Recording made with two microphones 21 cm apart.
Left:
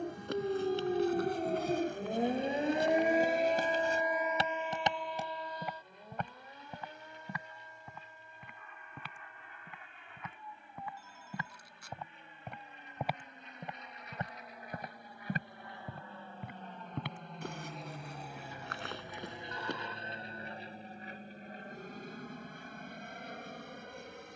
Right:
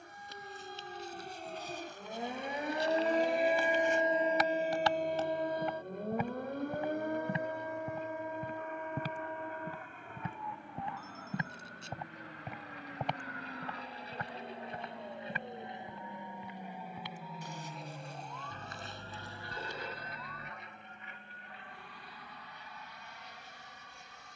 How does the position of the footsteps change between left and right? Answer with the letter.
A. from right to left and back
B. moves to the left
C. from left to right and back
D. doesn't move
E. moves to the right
C.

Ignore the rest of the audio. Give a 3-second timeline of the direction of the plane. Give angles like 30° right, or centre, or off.
60° right, 60° right, 60° right, 50° right, 40° right, 10° right, 20° left, 50° left.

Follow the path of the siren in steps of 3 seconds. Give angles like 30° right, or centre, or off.
50° left, 30° right, 70° right, 70° right, 80° right, 80° right, 80° right, 80° right.